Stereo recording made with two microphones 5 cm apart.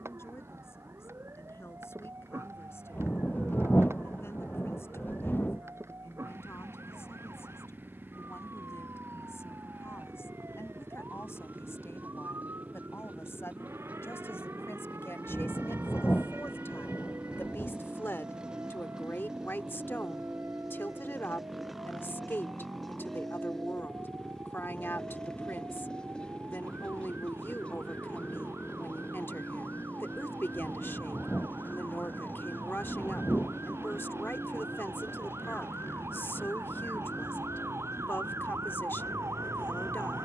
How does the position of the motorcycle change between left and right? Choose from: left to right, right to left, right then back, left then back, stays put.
right to left.